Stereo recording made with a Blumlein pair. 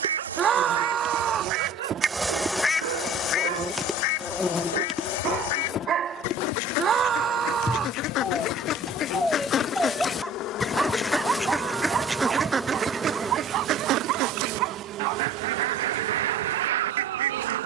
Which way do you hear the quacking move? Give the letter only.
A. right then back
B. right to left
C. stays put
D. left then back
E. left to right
D.